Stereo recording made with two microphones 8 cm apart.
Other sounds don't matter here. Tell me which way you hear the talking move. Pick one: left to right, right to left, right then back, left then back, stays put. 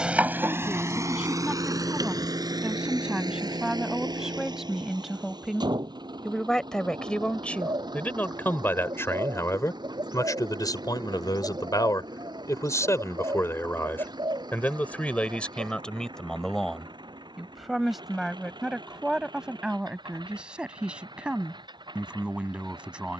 left then back.